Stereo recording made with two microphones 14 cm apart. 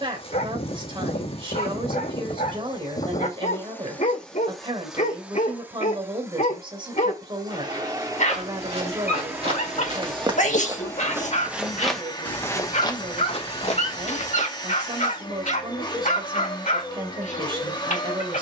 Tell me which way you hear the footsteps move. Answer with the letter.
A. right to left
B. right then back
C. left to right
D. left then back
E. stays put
A.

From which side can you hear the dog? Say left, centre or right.
left.